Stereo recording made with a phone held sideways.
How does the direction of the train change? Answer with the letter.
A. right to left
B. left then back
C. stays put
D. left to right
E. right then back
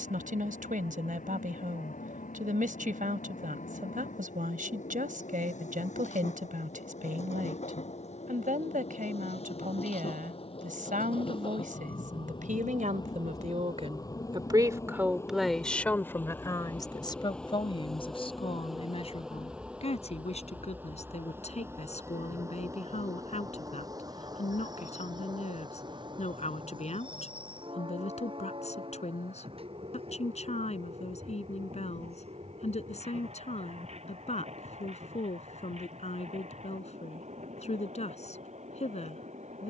D.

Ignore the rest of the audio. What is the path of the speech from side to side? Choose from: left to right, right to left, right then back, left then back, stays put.
right to left.